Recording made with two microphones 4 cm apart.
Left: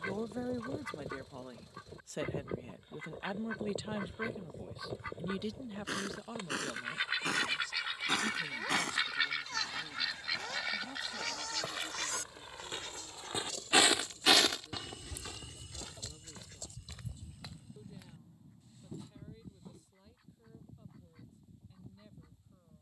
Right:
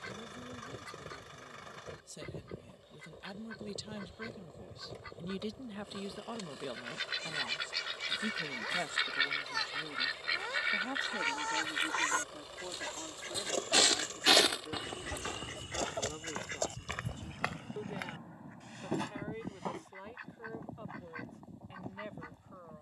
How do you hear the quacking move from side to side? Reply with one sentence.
In this clip you hear the quacking travel towards the right.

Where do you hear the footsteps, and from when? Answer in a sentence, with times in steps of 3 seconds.
You can hear the footsteps not at all from 0 s, on the left from 3 s, on the right from 15 s and not at all from 21 s.